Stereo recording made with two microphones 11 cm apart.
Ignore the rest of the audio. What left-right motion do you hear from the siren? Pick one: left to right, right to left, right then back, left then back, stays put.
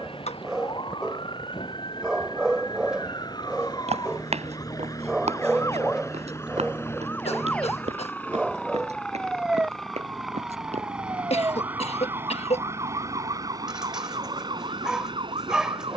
left to right.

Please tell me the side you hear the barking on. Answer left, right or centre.
centre.